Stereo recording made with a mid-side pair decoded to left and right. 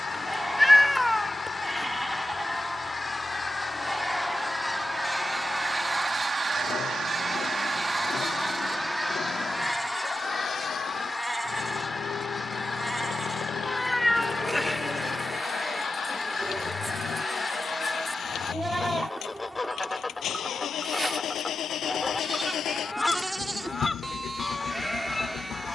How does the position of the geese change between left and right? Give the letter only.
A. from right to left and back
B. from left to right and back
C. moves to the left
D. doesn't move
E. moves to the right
B.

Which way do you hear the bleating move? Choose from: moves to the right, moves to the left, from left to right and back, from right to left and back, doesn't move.
doesn't move.